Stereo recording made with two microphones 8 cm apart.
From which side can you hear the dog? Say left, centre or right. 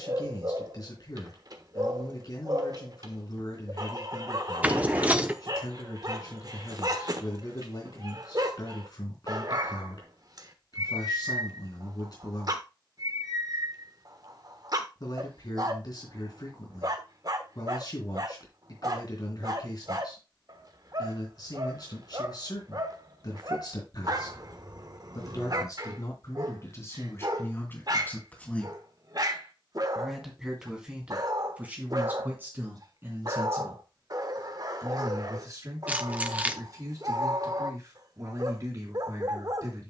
right.